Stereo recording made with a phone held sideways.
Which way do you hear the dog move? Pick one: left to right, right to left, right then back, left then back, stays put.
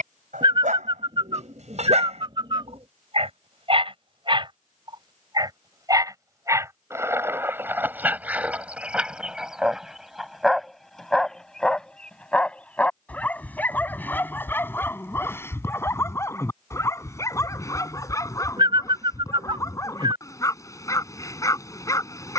right to left.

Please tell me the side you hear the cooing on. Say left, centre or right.
right.